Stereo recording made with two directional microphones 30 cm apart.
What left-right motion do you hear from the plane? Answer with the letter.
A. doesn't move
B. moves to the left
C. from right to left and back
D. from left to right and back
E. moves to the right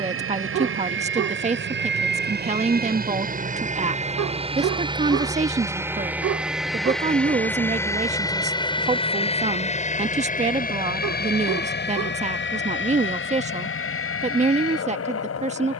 B.